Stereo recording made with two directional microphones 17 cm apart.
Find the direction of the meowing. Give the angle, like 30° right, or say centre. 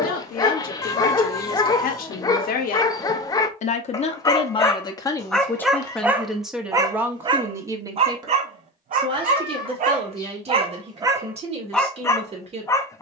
20° left.